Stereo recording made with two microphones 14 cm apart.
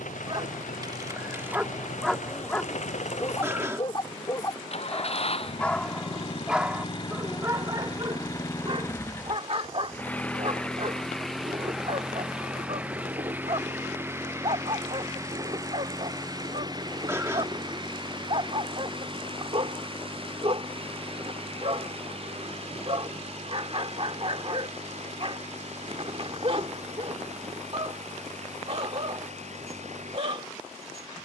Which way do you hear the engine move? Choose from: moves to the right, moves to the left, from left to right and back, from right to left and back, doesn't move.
moves to the right.